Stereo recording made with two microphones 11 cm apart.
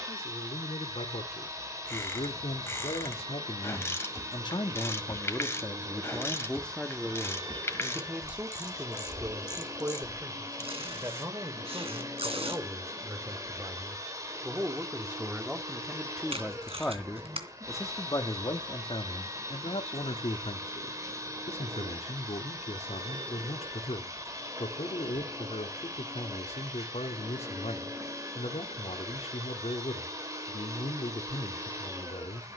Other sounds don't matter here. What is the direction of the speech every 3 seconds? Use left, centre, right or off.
left, left, centre, right, right, centre, left, left, left, left, left.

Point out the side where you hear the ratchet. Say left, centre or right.
left.